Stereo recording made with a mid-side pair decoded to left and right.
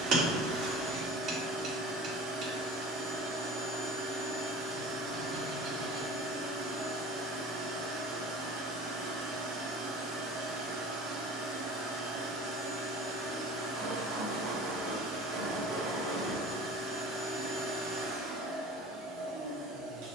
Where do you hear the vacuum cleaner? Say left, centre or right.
right.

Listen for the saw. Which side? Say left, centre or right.
right.